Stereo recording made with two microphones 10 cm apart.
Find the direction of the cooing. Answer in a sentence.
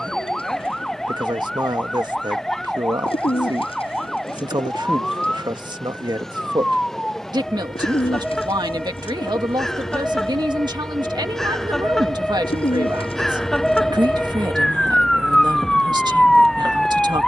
You can hear the cooing on the left.